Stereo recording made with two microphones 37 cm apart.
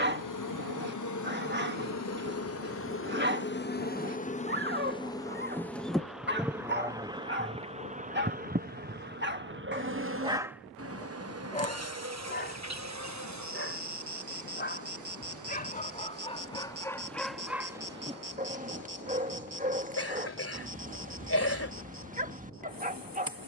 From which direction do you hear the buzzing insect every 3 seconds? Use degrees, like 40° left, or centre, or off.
50° left, 20° left, 10° right, 40° right, 50° right, 50° right, 60° right, 60° right.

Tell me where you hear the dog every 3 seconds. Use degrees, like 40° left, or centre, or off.
30° right, 30° right, 30° right, 10° right, 30° left, 10° left, 20° right, 20° right.